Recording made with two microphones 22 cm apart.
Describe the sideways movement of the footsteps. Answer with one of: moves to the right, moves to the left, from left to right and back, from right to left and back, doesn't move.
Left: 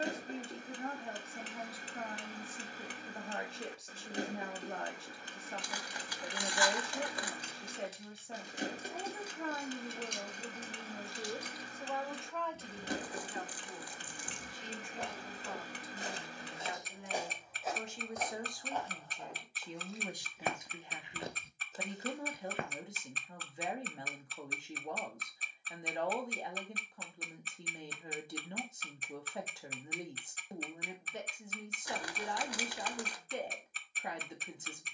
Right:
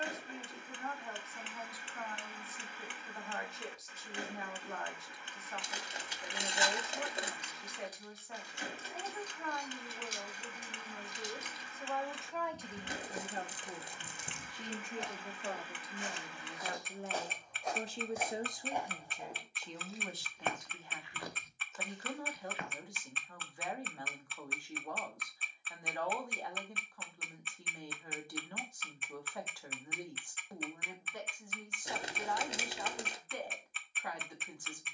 from left to right and back.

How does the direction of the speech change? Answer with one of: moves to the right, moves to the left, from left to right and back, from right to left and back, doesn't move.
from left to right and back.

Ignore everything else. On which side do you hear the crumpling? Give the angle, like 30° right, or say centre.
20° right.